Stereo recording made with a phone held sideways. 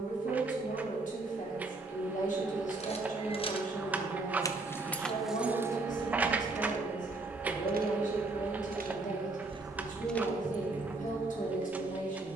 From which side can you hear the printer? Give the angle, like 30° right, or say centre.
10° right.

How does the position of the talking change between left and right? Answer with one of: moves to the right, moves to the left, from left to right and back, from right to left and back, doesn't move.
doesn't move.